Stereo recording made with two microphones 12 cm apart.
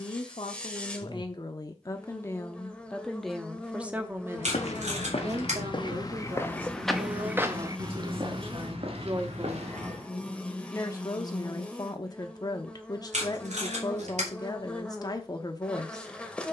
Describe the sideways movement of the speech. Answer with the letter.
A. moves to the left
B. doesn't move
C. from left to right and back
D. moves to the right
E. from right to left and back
C.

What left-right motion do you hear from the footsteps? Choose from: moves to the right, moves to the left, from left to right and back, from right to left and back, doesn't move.
moves to the right.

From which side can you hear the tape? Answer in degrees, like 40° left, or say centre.
70° right.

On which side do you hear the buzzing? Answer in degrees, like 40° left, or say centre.
10° left.